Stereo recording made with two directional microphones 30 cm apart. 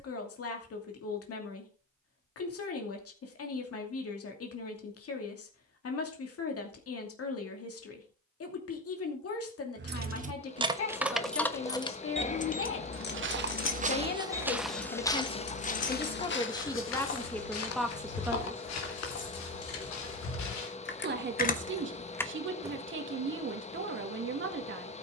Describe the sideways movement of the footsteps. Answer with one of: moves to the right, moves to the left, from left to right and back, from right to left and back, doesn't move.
moves to the left.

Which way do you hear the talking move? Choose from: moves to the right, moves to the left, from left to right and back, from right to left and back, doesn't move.
moves to the right.